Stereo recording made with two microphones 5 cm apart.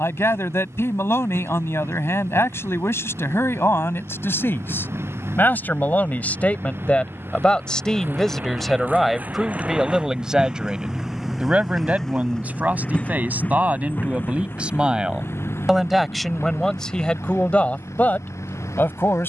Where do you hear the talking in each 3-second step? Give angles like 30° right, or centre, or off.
60° left, 50° left, 20° left, 20° right, 30° right, 10° left, 40° left.